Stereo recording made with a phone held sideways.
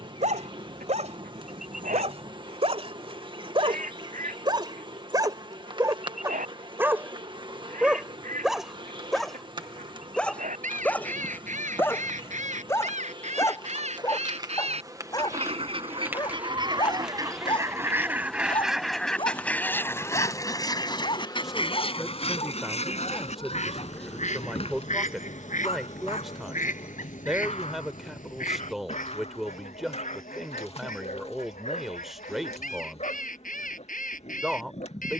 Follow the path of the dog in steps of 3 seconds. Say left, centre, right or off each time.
right, right, centre, centre, left, left, left, left, left, left, left, left.